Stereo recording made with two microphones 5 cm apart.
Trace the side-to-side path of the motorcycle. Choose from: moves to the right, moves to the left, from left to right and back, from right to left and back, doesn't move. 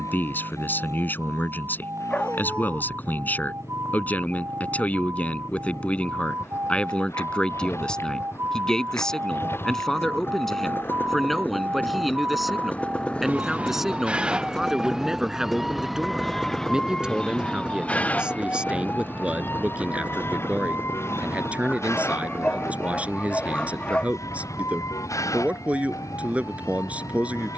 moves to the right.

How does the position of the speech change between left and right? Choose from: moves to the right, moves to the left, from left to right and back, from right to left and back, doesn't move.
moves to the right.